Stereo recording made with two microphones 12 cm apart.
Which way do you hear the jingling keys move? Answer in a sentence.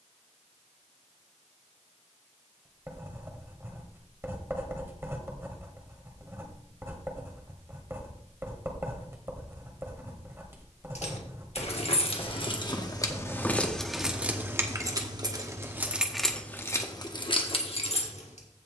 You can hear the jingling keys move from left to right and back again.